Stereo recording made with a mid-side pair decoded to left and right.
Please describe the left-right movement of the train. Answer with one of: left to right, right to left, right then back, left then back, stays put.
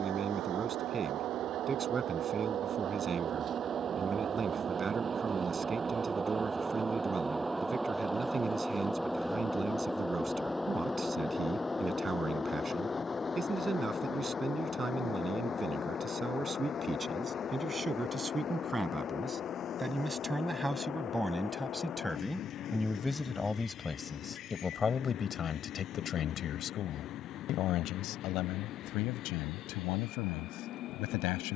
right to left.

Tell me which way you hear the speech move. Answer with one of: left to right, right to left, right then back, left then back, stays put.
right to left.